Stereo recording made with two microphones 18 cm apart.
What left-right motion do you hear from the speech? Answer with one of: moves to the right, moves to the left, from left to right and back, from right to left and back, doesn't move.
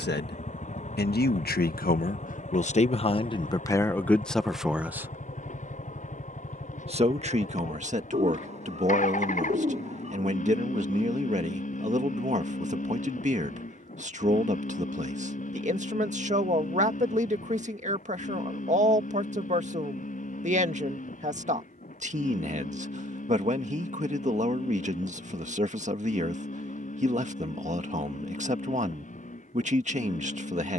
moves to the right.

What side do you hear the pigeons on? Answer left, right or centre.
right.